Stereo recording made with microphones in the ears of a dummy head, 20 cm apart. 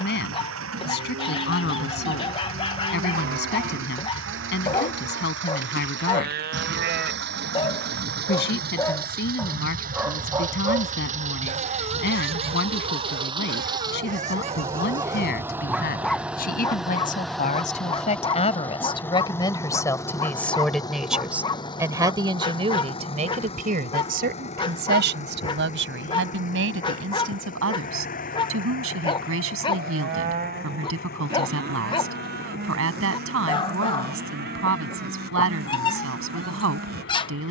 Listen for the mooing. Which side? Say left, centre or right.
right.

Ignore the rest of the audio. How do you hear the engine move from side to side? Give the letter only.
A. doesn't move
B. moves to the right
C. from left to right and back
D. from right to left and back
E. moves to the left
E.